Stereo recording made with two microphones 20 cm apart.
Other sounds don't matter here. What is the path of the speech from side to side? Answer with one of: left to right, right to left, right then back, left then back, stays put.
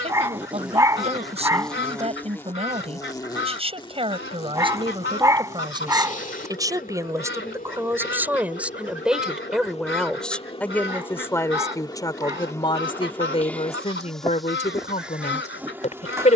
right to left.